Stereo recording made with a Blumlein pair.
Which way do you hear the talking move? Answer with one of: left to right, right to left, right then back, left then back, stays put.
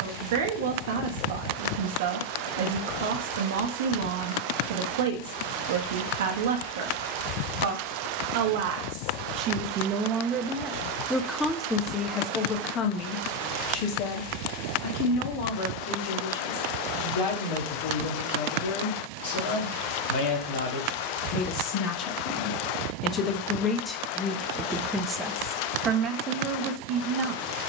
left then back.